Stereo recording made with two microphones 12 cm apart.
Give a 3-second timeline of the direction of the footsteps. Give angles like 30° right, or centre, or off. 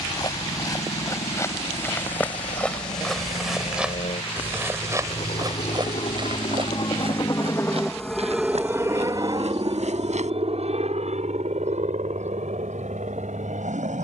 20° left, 20° right, 60° right, 70° right, off.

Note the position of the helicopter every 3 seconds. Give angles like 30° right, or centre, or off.
80° left, 70° left, 20° left, 50° right, 70° right.